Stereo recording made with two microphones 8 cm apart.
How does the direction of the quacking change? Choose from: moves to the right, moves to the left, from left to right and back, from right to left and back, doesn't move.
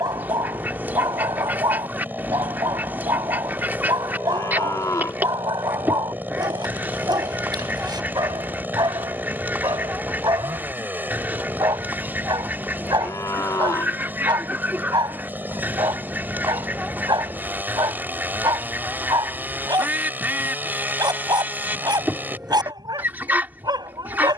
doesn't move.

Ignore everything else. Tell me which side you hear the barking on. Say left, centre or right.
right.